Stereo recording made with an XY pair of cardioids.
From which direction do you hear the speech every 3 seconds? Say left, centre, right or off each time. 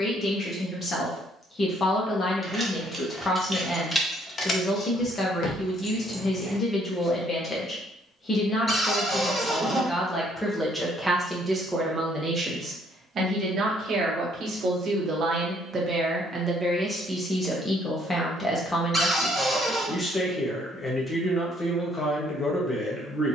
left, left, left, centre, right, centre, left, left.